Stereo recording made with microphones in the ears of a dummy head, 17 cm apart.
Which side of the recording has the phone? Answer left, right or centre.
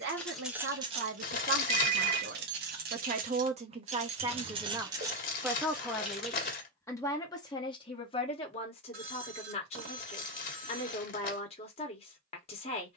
right.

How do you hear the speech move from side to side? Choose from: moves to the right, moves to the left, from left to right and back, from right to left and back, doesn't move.
moves to the left.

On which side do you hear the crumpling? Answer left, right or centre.
left.